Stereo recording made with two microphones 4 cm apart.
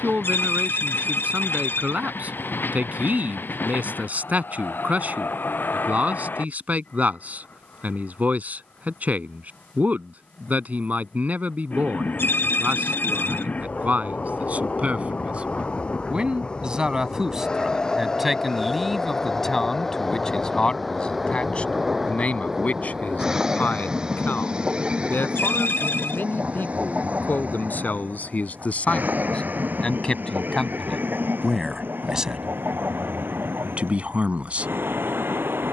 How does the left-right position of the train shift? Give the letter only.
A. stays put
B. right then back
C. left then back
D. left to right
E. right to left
D.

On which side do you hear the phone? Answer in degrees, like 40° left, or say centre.
70° left.